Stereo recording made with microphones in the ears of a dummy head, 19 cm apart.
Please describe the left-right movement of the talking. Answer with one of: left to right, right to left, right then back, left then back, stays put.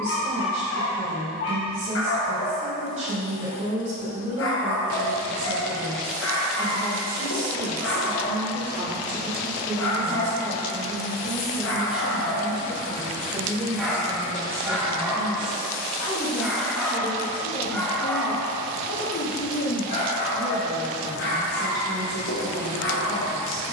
right to left.